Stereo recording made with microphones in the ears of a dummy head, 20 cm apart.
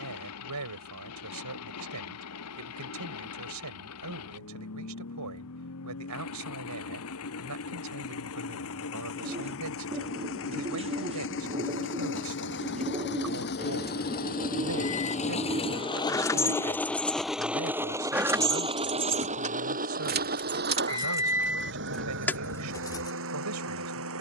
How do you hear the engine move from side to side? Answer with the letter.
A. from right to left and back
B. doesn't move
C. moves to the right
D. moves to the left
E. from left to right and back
C.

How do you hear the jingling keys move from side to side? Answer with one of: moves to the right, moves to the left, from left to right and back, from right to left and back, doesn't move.
from left to right and back.